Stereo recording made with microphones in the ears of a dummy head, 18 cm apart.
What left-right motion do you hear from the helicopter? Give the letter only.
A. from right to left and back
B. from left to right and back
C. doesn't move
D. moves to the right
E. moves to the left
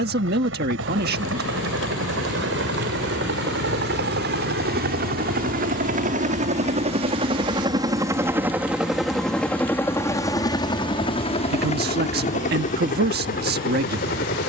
E.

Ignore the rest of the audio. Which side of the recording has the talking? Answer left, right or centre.
right.